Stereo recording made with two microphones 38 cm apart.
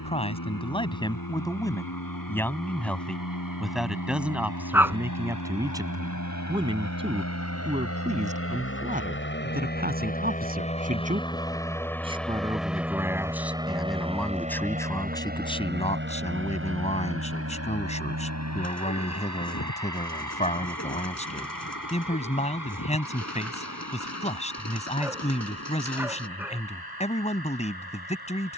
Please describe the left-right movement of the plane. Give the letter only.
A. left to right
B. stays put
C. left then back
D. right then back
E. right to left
A.